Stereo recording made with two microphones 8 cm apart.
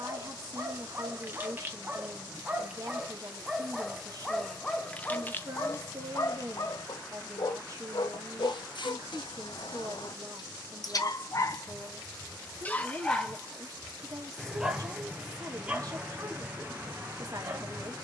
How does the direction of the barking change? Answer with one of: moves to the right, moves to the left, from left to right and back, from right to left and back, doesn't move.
from right to left and back.